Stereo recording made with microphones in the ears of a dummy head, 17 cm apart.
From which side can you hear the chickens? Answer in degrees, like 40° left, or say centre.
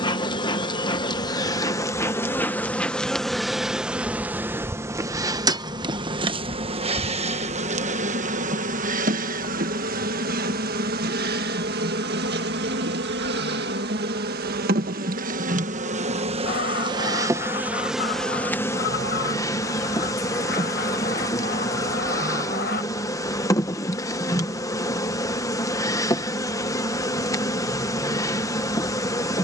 50° left.